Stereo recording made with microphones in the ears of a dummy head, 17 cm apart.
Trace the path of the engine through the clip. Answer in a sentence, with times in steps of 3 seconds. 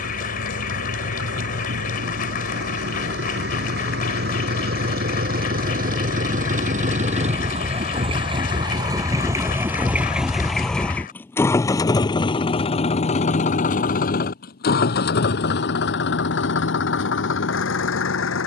In this clip you hear the engine on the right from 0 s, in the centre from 9 s and on the left from 12 s.